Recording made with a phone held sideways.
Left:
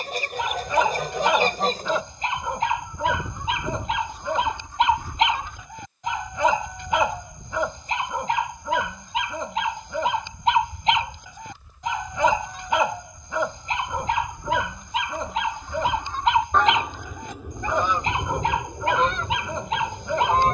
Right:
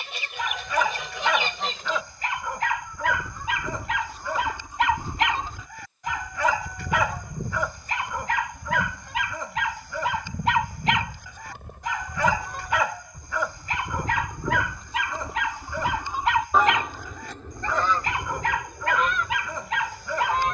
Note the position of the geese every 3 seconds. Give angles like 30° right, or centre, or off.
40° left, centre, 60° right, 70° right, 50° right, 10° right, 30° left.